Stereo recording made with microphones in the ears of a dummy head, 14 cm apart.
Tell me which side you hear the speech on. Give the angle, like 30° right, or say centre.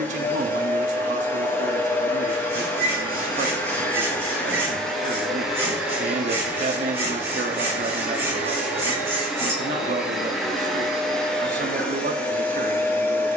60° right.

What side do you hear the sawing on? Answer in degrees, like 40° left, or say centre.
20° right.